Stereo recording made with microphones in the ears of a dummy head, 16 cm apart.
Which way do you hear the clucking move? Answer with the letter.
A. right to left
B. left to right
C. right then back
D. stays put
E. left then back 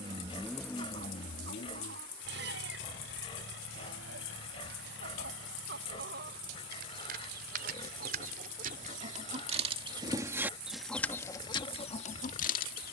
A.